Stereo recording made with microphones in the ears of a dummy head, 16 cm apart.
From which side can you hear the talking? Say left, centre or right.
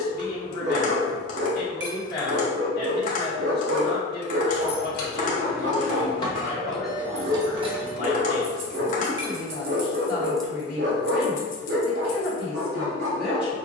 left.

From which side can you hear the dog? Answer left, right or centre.
right.